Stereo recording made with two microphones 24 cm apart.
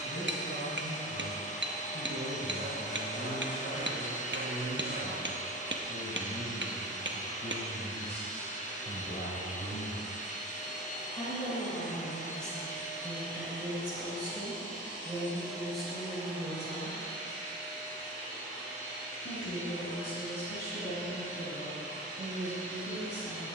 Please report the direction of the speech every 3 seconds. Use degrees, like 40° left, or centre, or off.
50° left, 50° left, 50° left, 30° left, 10° right, centre, 40° left, 50° left.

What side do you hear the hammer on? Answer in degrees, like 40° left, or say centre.
50° right.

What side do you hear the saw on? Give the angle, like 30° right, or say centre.
40° right.